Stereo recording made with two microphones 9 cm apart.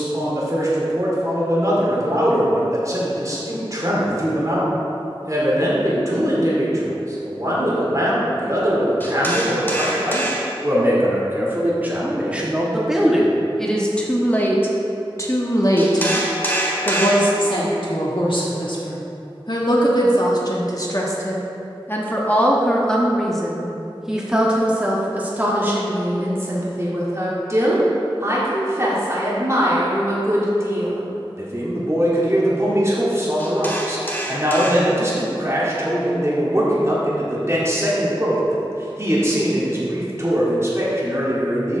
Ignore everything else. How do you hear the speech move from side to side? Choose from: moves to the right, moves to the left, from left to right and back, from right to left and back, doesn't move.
from right to left and back.